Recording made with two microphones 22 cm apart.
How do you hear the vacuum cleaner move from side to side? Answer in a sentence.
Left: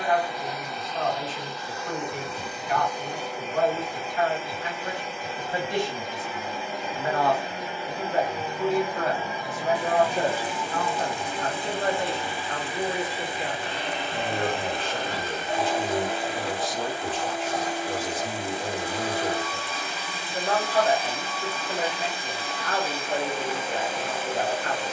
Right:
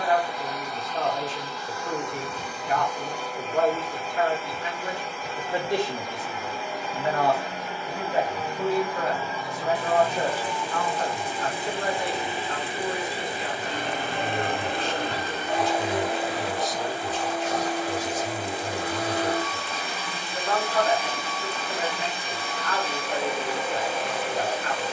In this clip you hear the vacuum cleaner travel towards the right.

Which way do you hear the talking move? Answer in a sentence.
In this clip you hear the talking move to the left.